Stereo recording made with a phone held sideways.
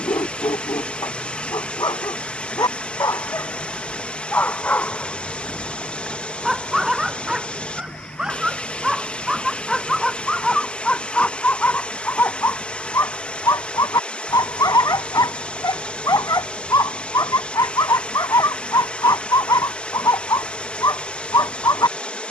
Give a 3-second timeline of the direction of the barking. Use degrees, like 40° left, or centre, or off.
30° left, 10° left, centre, 10° left, 30° left, 30° left, 30° left, 30° left.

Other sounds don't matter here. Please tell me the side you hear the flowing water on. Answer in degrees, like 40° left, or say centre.
10° left.